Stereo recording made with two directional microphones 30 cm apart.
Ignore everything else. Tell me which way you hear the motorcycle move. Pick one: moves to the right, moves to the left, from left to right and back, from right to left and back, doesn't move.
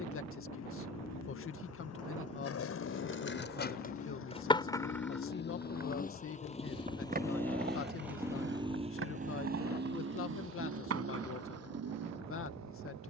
moves to the right.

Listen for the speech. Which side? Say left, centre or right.
left.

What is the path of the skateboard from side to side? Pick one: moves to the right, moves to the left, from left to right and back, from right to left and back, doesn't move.
moves to the right.